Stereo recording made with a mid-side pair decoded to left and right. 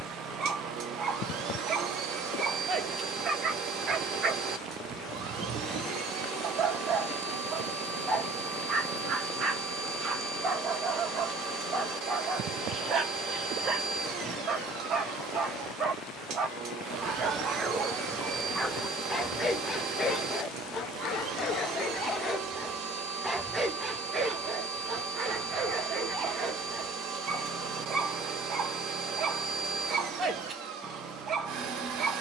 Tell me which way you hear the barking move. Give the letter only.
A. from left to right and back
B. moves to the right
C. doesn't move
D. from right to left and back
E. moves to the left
D.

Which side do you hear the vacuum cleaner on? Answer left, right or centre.
right.